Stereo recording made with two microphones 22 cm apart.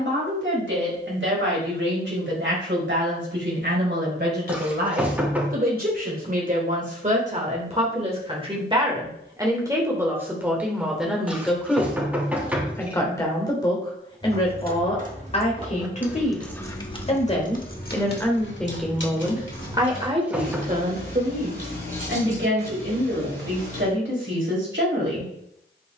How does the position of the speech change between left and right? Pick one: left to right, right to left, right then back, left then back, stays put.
left then back.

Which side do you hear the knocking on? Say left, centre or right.
centre.